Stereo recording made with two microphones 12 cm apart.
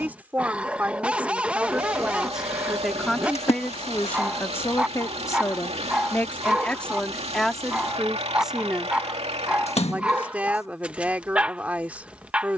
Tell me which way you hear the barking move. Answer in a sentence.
In this clip you hear the barking stay put.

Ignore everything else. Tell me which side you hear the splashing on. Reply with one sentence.
You can hear the splashing on the left.